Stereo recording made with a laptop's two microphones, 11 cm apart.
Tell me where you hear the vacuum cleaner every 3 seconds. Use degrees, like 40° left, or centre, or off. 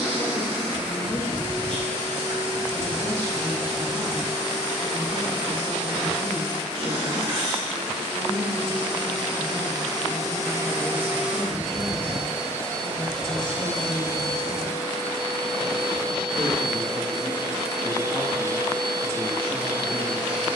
50° right, 50° right, 50° right, 20° right, 10° right, 50° right, 50° right.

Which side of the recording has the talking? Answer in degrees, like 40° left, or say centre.
10° left.